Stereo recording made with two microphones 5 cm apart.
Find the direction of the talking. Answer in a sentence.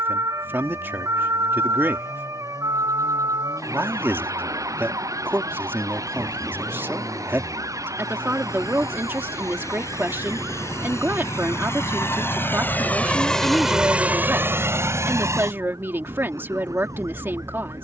In this clip you hear the talking on the right.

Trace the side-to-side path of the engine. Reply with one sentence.
You can hear the engine move from left to right.